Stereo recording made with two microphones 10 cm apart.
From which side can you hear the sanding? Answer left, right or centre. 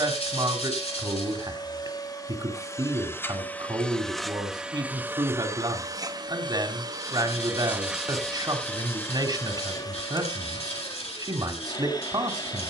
left.